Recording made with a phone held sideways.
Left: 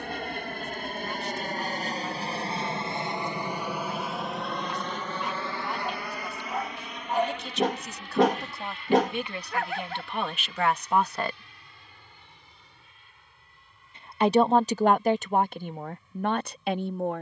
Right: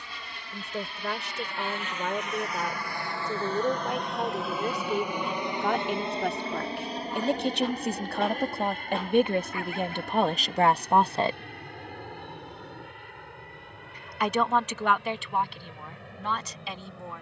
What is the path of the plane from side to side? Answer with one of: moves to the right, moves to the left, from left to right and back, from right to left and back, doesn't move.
moves to the right.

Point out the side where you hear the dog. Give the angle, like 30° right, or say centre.
80° left.